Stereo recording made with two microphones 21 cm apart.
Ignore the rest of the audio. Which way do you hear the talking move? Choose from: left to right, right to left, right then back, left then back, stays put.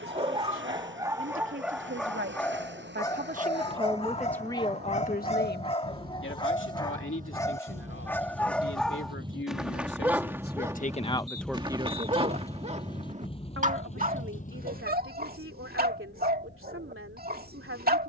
left then back.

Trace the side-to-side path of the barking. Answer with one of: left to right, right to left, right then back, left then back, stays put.
left then back.